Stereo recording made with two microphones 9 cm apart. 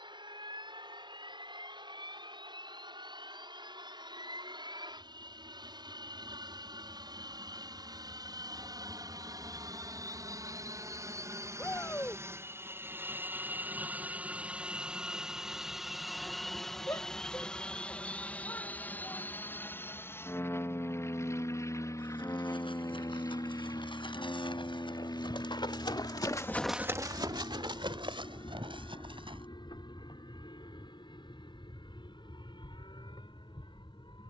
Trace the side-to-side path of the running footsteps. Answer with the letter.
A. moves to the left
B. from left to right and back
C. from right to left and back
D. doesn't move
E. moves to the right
E.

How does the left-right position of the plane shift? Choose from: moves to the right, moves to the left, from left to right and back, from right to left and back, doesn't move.
moves to the left.